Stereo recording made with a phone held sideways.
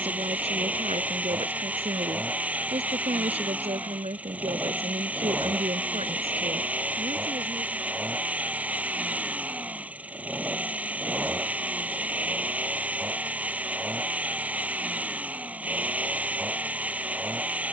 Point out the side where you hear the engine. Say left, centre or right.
centre.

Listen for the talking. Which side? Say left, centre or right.
right.